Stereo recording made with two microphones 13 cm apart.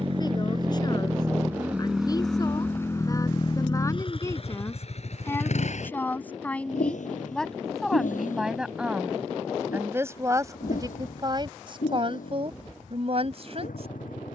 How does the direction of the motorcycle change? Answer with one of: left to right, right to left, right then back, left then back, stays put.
right to left.